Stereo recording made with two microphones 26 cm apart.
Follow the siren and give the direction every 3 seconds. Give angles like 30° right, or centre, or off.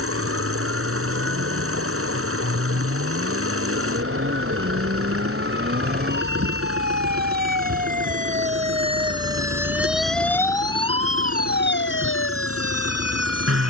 60° right, 50° right, 40° right, 10° left, 60° left.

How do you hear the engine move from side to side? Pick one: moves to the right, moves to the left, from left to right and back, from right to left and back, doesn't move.
doesn't move.